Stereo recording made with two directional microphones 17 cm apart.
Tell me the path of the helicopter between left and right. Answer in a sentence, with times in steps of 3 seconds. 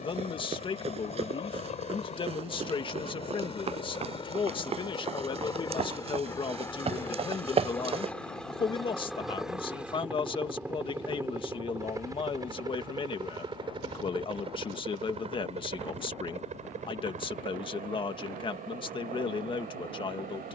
You can hear the helicopter on the left from 0 s, in the centre from 6 s and on the right from 12 s.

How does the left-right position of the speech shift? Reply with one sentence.
In this clip you hear the speech stay put.